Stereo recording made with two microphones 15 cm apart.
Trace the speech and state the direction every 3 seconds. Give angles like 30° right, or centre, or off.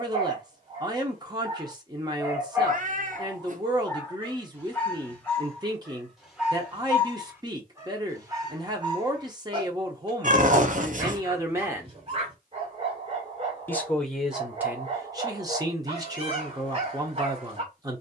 30° right, 30° right, 30° right, 20° right, centre, 20° right.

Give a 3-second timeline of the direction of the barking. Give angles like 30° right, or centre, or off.
30° right, 10° left, 20° right, 40° right, 40° right, 40° right.